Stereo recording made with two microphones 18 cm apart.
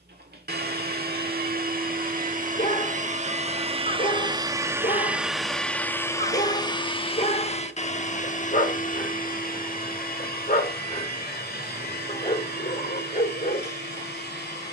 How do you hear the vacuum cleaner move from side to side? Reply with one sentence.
In this clip you hear the vacuum cleaner travel towards the left.